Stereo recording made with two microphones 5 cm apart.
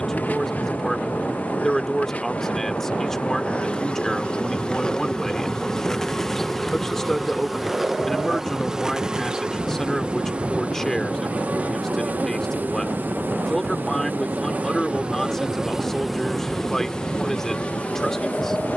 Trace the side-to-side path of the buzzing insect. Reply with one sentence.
You can hear the buzzing insect go right and come back.